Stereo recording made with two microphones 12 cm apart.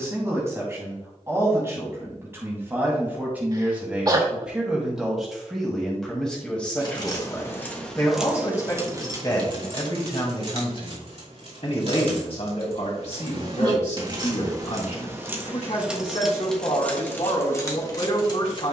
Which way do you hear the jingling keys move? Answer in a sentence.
You can hear the jingling keys move from left to right and back again.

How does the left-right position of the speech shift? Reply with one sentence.
In this clip you hear the speech move from right to left.